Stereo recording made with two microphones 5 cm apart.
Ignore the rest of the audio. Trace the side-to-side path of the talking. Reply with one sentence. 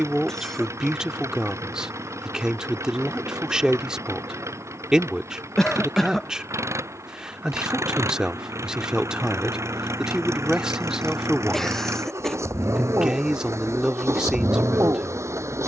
In this clip you hear the talking stay in one place.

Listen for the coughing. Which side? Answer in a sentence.
You can hear the coughing in the centre.